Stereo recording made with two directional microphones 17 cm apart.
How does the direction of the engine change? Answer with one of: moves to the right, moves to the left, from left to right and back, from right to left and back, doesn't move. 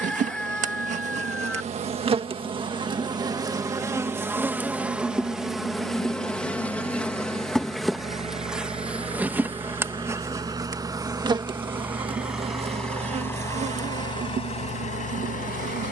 moves to the left.